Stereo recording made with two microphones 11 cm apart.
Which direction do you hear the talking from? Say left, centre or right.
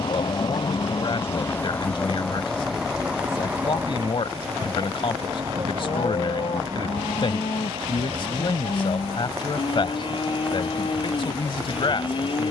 left.